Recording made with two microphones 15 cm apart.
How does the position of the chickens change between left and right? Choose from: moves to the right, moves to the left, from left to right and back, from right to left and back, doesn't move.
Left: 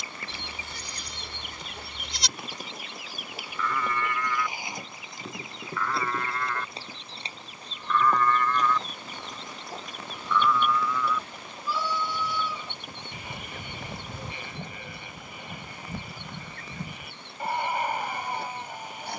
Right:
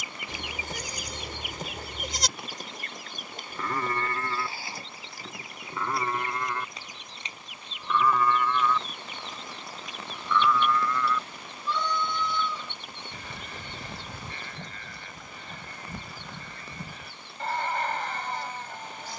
moves to the left.